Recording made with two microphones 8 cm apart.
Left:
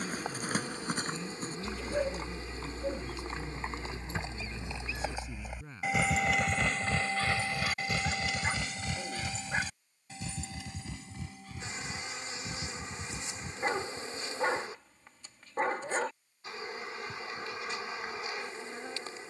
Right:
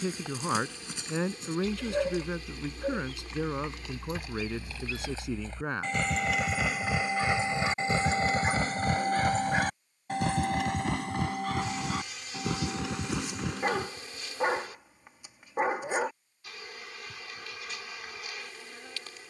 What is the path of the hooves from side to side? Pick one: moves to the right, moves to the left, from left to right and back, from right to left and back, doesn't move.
moves to the right.